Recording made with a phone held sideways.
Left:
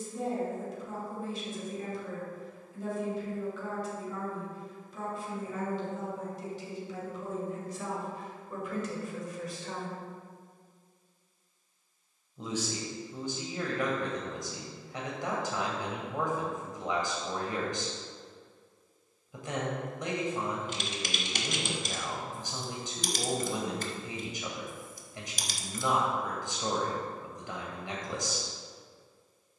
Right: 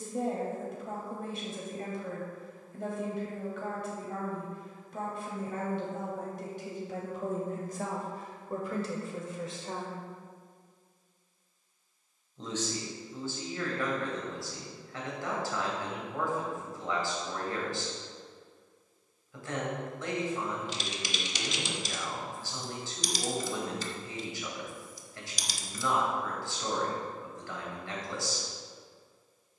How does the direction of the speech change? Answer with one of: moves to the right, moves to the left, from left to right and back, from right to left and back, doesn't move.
moves to the left.